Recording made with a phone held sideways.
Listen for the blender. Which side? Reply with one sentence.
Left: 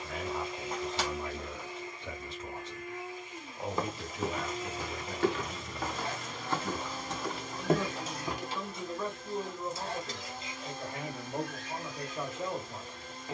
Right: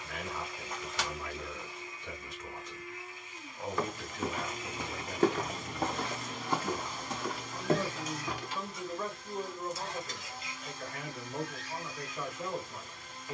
You can hear the blender on the left.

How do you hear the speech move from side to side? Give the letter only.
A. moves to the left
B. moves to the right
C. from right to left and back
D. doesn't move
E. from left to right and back
E.